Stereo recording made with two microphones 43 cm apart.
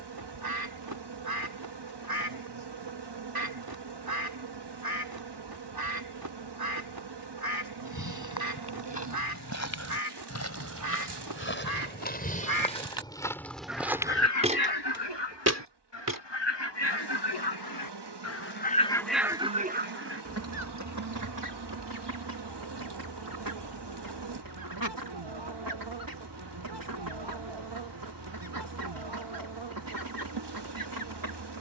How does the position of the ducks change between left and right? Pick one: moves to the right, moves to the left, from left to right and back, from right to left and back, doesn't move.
from right to left and back.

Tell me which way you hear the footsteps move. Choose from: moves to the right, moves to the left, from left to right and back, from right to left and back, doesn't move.
moves to the right.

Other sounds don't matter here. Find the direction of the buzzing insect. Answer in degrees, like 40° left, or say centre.
70° right.